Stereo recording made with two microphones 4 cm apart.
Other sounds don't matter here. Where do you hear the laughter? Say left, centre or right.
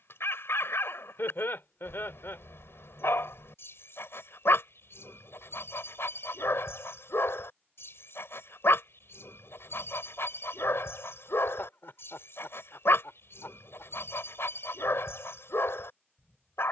left.